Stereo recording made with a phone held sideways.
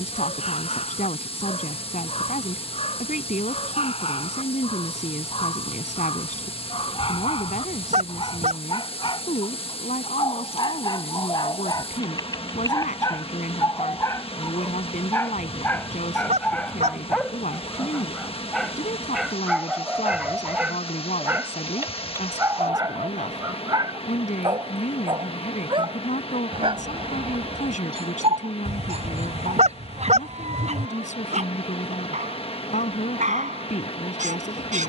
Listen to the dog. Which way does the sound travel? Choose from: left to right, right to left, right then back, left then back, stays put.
left to right.